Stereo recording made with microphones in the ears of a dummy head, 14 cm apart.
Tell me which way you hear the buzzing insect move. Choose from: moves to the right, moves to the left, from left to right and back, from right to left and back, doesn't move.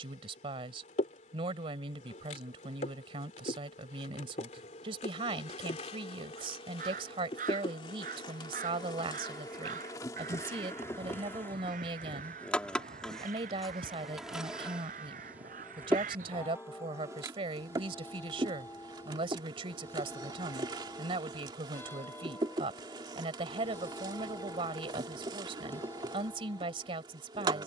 moves to the right.